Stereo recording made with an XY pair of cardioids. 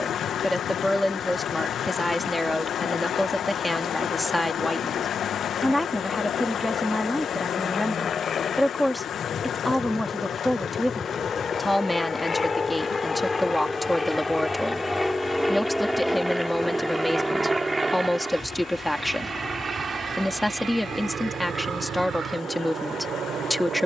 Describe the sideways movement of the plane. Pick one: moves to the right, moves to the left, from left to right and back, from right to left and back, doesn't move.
moves to the right.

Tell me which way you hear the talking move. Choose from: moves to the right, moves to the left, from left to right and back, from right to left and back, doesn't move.
doesn't move.